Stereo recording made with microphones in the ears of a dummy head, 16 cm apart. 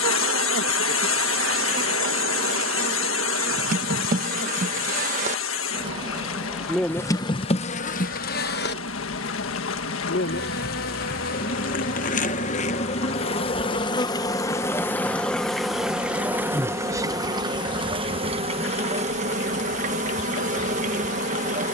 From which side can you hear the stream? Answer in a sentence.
You can hear the stream on the left.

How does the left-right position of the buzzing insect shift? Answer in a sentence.
In this clip you hear the buzzing insect move from right to left and back again.